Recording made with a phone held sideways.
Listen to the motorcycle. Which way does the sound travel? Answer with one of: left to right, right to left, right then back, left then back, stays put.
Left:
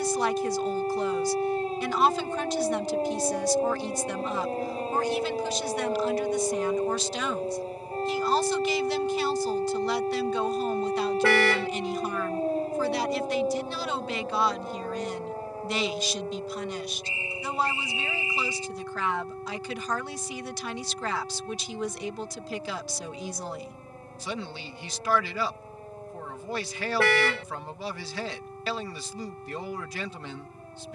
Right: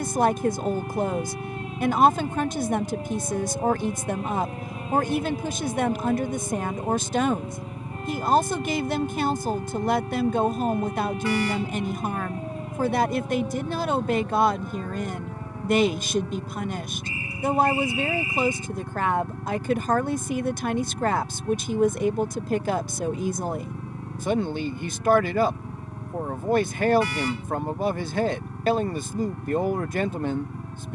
stays put.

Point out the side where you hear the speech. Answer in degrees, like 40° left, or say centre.
50° right.